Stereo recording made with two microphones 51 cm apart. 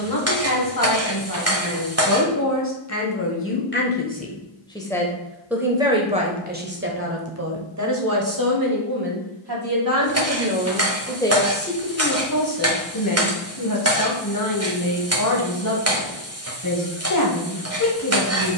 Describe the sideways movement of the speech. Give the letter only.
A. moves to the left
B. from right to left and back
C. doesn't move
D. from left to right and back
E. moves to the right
D.